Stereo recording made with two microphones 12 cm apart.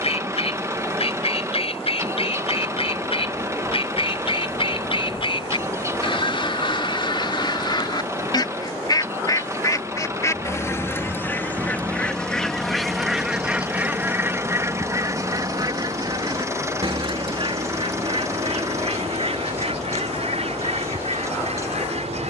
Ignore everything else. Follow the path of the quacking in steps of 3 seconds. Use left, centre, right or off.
left, left, left, left, centre, right, right, right.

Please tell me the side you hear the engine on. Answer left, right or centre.
right.